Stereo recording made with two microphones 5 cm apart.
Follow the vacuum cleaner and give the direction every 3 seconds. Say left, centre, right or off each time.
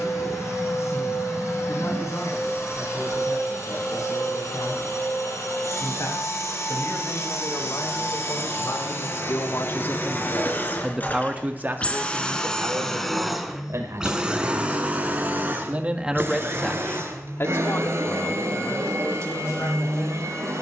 left, left, left, left, centre, right, right.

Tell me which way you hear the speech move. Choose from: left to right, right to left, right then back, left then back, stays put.
right then back.